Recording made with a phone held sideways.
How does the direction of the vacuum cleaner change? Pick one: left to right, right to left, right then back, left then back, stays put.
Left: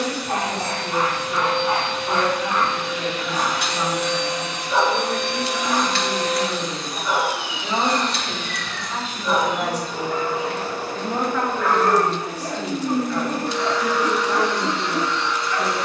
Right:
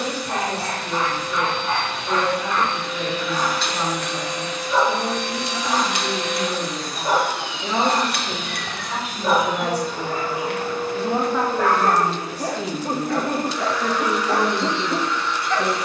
right then back.